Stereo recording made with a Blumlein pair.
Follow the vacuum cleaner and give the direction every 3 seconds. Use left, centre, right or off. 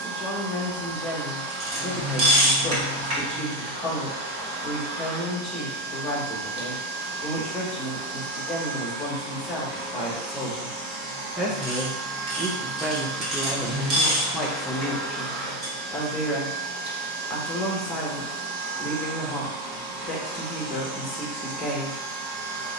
right, right, right, right, centre, right, right, right.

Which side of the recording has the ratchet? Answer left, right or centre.
right.